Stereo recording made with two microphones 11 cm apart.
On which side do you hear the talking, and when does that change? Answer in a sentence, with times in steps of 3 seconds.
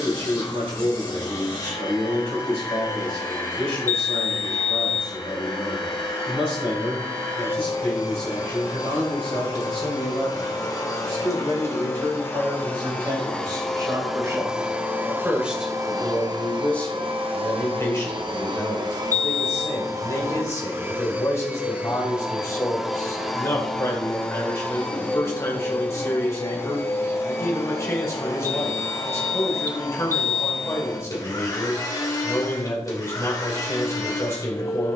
You can hear the talking on the right from 0 s, in the centre from 15 s and on the left from 18 s.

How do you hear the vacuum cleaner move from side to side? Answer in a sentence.
You can hear the vacuum cleaner move from left to right and back again.